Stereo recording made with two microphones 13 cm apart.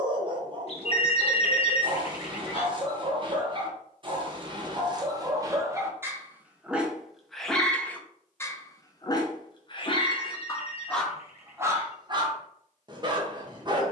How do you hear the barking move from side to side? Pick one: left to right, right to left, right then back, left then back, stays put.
left then back.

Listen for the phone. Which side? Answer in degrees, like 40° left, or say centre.
50° left.